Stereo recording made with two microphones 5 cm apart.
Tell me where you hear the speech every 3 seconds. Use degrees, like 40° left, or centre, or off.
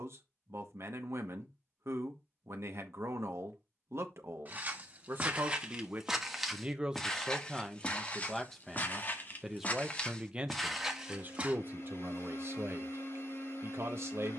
70° right, 50° right, 10° right, 30° right, 60° right.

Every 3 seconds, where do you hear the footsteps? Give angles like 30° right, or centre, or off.
off, 30° right, 20° left, 10° left, off.